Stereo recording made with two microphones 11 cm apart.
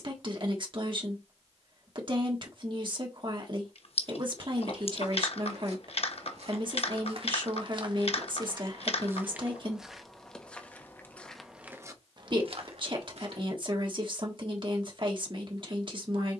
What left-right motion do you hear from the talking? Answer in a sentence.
In this clip you hear the talking stay in one place.